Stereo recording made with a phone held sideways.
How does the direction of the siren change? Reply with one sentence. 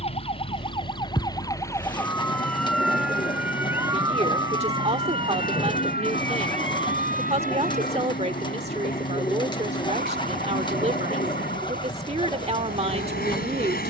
In this clip you hear the siren move to the right.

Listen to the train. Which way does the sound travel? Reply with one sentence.
In this clip you hear the train stay put.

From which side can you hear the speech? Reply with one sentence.
In this clip you hear the speech on the right.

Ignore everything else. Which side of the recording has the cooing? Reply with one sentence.
You can hear the cooing on the left.